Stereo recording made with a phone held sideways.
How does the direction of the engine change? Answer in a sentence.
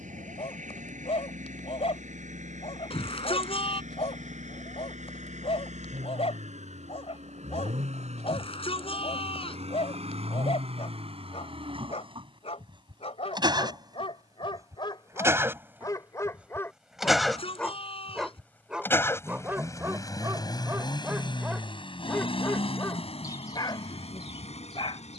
In this clip you hear the engine travel towards the left.